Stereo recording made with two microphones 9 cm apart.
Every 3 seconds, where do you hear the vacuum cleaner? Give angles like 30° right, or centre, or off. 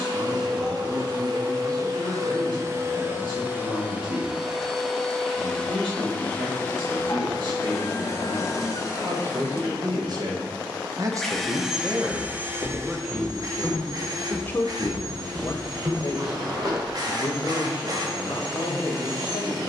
40° right, 10° right, 30° left, 20° left, 40° right, 50° right, 50° right.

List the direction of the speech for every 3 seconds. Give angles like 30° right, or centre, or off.
70° right, 70° right, 60° right, 40° right, centre, 50° left, 70° left.